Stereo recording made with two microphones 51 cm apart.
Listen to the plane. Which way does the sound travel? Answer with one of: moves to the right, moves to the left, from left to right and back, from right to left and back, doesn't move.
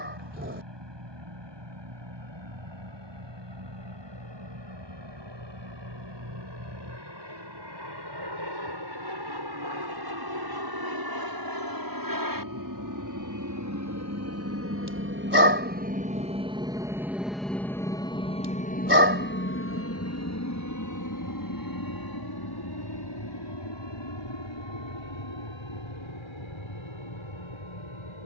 moves to the left.